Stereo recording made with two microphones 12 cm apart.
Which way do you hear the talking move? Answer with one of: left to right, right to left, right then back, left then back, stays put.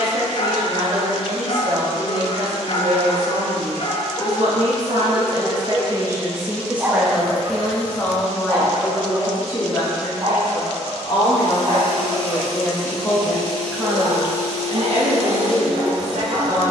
left then back.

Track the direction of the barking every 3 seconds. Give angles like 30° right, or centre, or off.
60° left, 30° left, 20° right, 40° right, 50° right, 50° right.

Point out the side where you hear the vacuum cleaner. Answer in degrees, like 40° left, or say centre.
10° left.